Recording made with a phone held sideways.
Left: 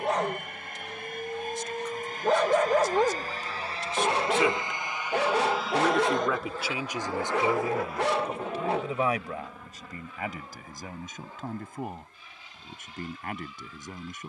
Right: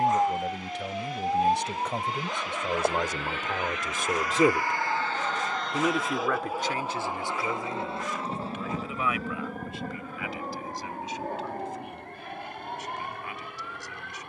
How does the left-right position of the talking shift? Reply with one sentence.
In this clip you hear the talking travel towards the left.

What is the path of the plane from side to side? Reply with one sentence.
In this clip you hear the plane move to the right.